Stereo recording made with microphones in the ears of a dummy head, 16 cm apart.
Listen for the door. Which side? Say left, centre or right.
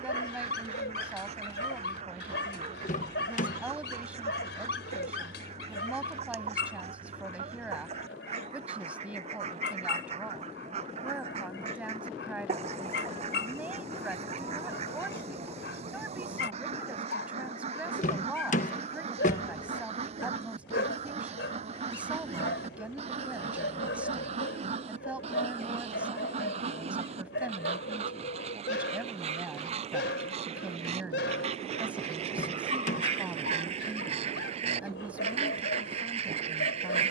left.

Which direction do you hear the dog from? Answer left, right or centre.
left.